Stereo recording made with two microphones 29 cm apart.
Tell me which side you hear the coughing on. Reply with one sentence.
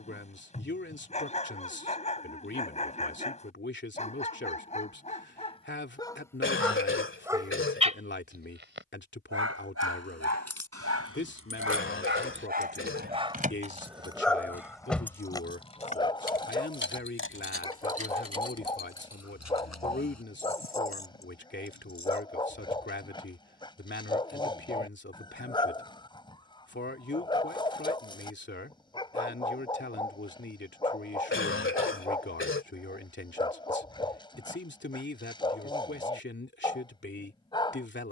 In this clip you hear the coughing on the left.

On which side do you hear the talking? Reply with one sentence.
You can hear the talking on the left.